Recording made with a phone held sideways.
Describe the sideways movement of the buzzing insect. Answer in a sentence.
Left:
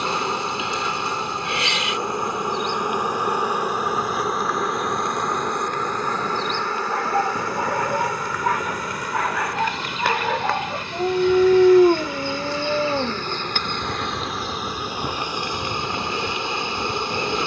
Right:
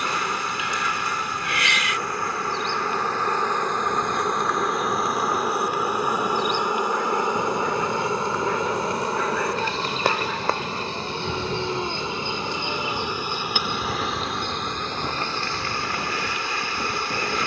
You can hear the buzzing insect move from left to right and back again.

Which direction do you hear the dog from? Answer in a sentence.
In this clip you hear the dog on the left.